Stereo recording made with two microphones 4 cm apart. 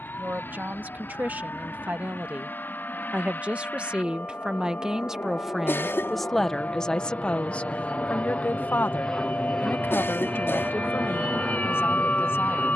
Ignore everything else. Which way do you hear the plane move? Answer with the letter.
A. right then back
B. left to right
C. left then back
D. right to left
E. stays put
B.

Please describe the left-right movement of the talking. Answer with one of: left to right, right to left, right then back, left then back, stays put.
right to left.